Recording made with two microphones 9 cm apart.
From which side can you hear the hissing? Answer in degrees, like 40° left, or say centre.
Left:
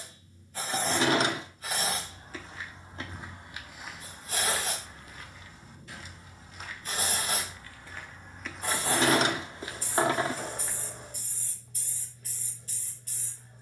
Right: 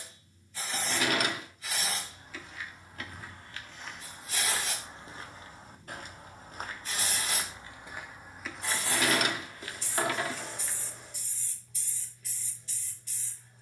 50° left.